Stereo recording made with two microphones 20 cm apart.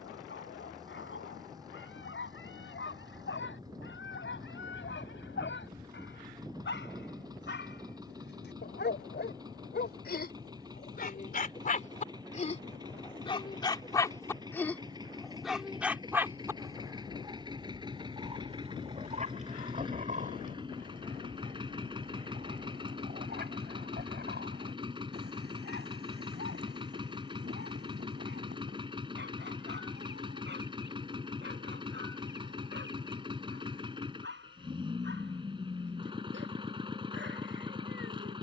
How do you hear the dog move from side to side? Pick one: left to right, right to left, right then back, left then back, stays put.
left to right.